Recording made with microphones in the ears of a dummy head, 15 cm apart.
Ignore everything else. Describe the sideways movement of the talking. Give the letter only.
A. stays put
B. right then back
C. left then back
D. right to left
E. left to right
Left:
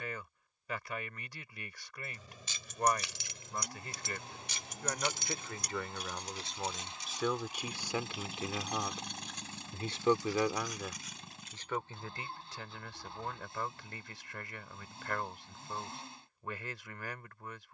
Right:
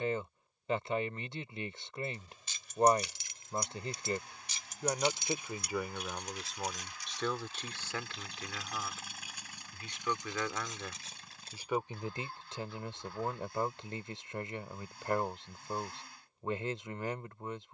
C.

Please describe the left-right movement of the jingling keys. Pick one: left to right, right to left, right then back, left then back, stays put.
left to right.